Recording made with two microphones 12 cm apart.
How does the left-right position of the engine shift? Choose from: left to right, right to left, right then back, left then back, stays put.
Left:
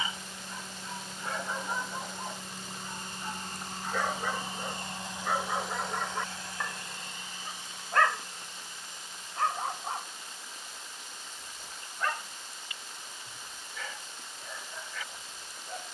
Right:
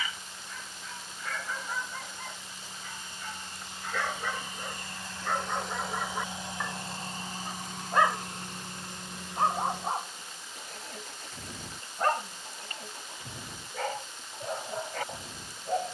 left to right.